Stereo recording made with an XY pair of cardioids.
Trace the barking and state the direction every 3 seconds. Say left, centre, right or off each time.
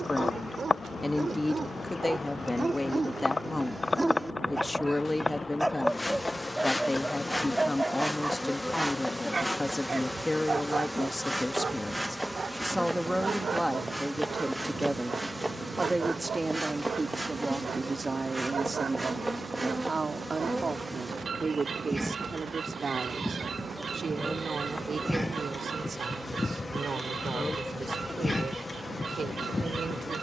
right, centre, centre, right, right, right, right, right, right, right.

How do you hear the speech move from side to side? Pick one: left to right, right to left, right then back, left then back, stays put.
left to right.